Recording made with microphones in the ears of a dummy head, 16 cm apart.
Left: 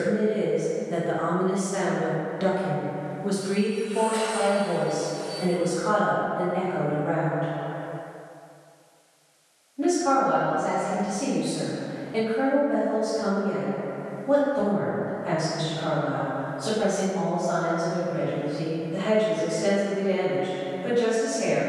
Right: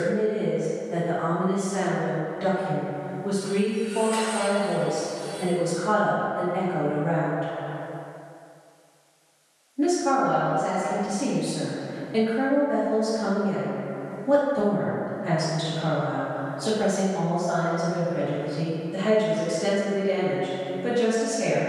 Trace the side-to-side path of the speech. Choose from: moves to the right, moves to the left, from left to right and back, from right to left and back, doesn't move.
moves to the right.